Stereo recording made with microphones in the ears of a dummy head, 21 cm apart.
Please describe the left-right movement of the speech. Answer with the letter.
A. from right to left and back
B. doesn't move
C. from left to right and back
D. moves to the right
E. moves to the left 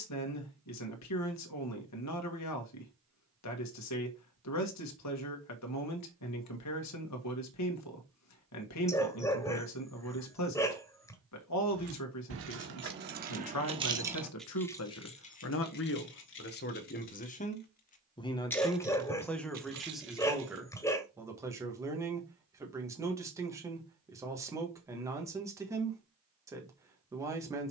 D.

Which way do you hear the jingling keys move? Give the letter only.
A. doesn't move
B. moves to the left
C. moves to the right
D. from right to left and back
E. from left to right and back
D.